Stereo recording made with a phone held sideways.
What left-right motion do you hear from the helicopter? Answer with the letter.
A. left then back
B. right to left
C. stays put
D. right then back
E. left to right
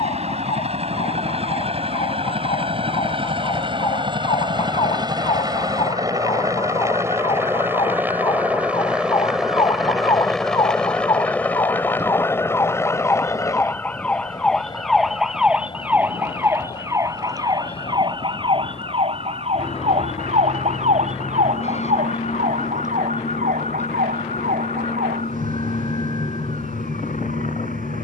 B.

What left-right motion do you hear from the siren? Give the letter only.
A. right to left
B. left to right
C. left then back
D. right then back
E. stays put
B.